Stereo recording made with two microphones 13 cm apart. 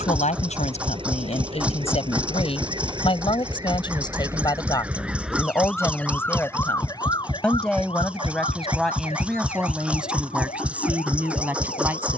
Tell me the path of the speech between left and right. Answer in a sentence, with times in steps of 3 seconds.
In this clip you hear the speech on the left from 0 s and in the centre from 6 s.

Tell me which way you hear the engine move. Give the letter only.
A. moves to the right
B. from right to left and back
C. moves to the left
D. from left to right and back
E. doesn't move
E.